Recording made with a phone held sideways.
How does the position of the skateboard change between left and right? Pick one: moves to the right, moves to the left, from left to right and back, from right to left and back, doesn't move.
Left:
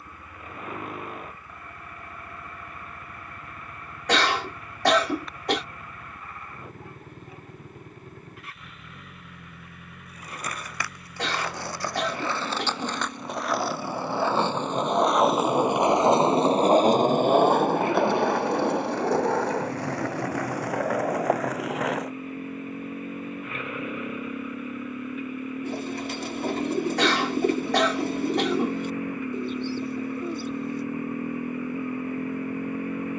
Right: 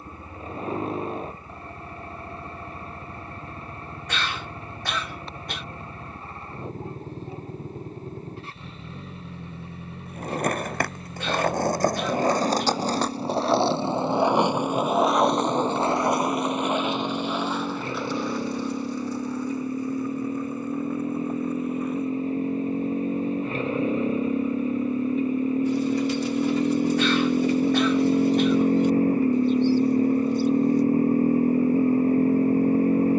moves to the left.